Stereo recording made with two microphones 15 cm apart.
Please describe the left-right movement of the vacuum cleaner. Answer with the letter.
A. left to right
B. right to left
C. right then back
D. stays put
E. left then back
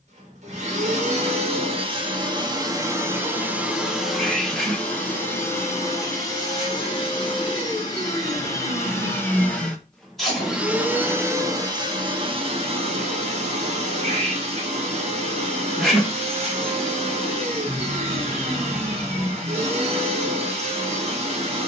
E.